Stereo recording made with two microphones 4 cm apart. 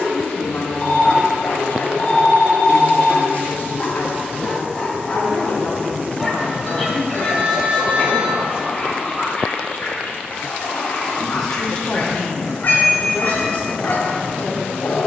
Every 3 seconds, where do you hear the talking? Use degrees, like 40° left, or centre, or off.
40° left, 40° left, centre, 10° left, 30° left.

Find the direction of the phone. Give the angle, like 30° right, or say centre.
40° left.